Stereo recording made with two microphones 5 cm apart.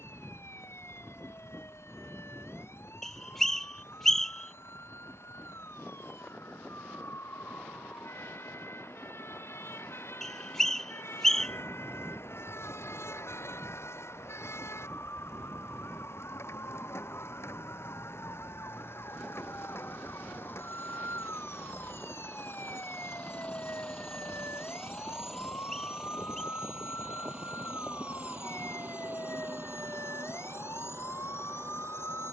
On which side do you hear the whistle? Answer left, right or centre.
centre.